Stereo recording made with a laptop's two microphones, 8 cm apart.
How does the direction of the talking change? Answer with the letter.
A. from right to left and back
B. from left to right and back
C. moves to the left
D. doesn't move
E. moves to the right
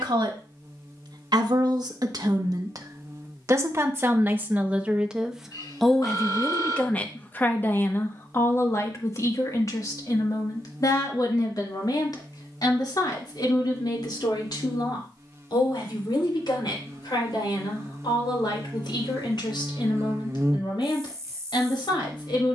C.